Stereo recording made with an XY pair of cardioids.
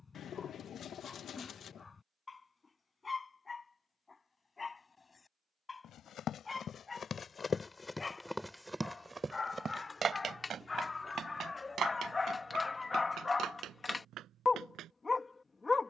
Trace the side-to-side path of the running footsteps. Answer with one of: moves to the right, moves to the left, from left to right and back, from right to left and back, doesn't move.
moves to the right.